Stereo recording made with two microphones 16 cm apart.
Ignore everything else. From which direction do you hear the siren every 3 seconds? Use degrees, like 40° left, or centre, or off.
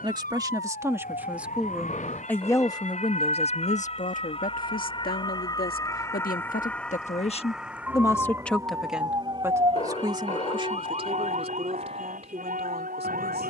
60° left, 30° left, centre, 40° right, 60° right.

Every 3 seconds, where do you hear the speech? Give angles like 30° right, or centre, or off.
centre, 60° left, 30° left, 30° right, 40° right.